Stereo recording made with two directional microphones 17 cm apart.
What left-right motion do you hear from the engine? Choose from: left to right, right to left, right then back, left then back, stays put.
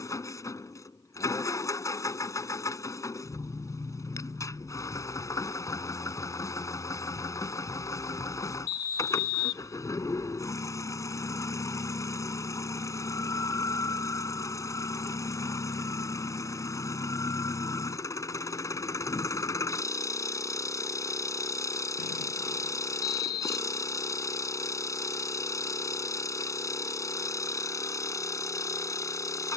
stays put.